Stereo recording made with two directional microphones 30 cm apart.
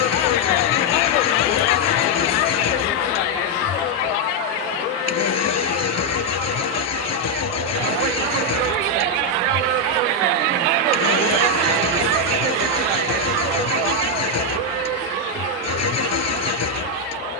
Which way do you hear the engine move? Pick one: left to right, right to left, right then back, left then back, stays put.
stays put.